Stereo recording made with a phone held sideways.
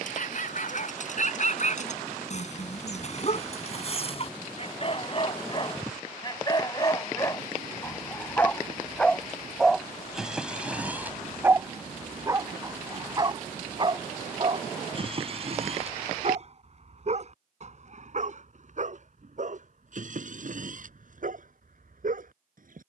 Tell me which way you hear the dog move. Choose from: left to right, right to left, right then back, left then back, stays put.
left to right.